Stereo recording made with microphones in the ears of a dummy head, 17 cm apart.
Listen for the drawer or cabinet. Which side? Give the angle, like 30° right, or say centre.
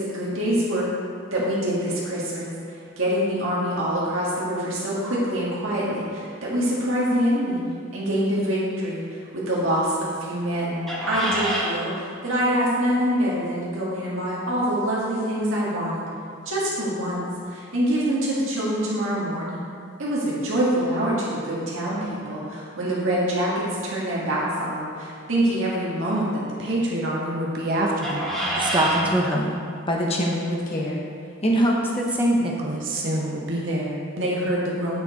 centre.